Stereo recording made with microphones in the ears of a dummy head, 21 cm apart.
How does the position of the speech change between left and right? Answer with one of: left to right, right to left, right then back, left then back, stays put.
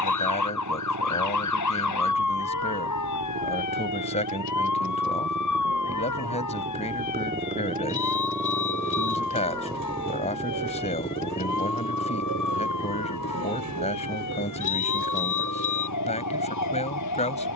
stays put.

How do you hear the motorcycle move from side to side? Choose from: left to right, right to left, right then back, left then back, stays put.
right to left.